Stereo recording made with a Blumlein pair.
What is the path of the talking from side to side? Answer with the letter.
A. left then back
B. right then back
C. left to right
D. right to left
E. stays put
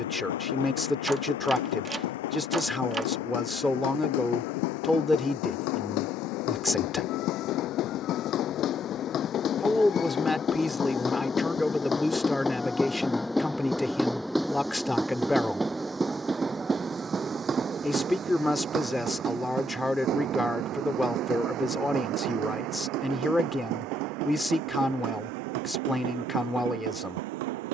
E.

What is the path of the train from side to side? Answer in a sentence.
You can hear the train travel towards the right.